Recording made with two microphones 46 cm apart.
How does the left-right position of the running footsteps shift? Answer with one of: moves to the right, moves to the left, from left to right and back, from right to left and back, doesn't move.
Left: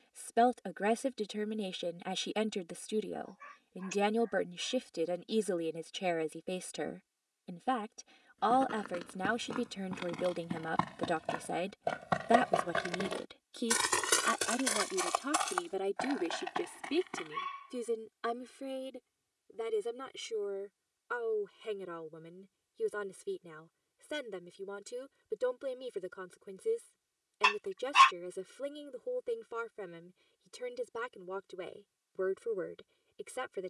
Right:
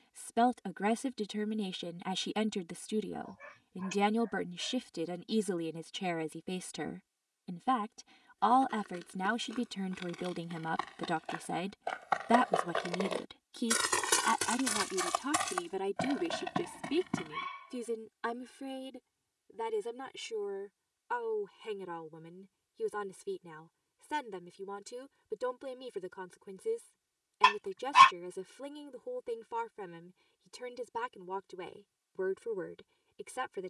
moves to the right.